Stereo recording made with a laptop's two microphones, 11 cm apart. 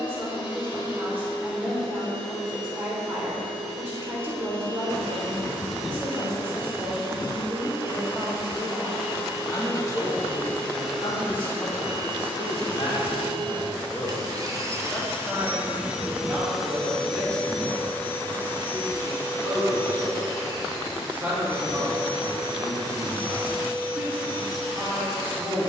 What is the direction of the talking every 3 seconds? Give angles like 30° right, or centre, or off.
20° right, 20° right, 10° right, 40° left, 30° left, 10° right, 20° right, 20° right, 20° right.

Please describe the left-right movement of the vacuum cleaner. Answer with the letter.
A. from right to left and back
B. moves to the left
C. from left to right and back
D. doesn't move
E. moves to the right
C.